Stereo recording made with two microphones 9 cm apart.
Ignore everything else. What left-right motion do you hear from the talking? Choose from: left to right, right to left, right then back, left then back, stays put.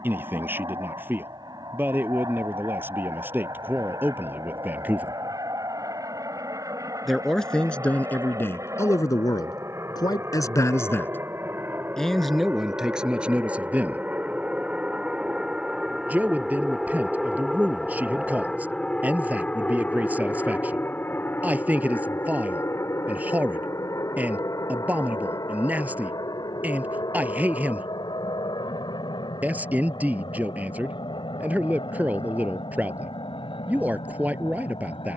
left then back.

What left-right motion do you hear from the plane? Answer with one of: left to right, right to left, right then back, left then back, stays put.
right to left.